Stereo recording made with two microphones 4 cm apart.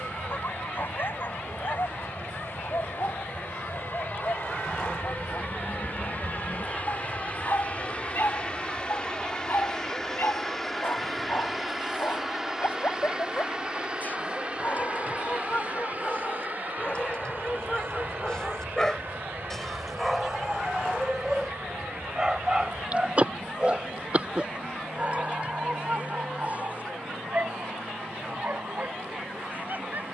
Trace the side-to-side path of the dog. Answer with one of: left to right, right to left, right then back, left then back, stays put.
left to right.